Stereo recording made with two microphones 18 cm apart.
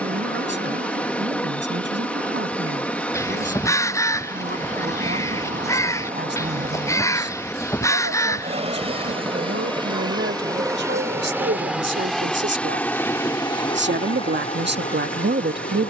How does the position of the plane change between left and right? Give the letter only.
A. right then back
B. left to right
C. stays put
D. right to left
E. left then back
D.